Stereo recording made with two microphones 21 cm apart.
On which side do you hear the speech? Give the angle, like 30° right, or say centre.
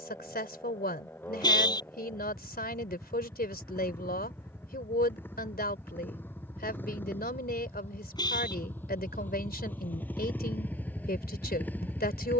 50° left.